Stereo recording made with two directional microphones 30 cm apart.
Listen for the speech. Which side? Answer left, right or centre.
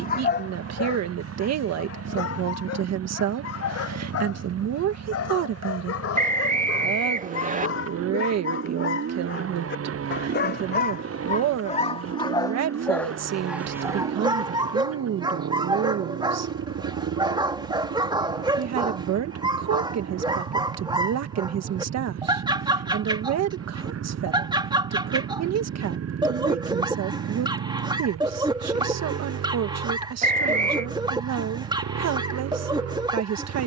right.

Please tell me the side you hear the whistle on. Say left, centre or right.
right.